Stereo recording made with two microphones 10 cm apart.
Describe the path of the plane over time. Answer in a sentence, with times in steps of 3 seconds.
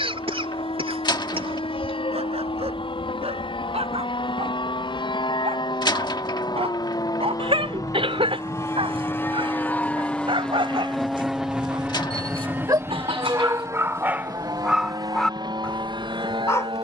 You can hear the plane on the left from 0 s, in the centre from 9 s and on the right from 12 s.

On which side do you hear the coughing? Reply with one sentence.
In this clip you hear the coughing on the right.